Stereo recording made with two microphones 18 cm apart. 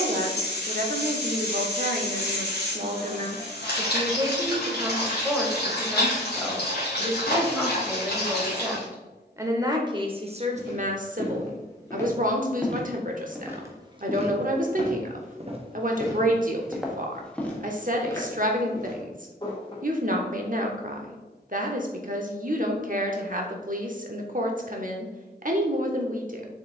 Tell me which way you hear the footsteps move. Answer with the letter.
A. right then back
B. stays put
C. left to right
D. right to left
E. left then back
A.